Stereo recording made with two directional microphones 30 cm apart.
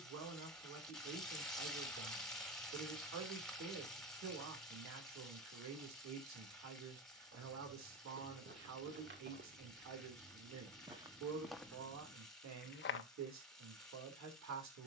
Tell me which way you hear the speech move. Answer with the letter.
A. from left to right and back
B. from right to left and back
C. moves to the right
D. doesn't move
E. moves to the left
D.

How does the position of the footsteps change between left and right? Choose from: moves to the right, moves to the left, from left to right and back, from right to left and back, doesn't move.
moves to the left.